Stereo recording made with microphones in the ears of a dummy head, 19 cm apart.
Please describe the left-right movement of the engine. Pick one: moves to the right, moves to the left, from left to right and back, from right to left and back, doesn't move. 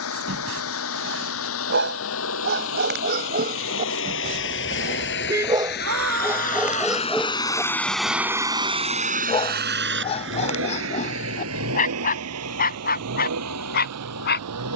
moves to the right.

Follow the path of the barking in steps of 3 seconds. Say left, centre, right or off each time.
right, right, centre, left, left.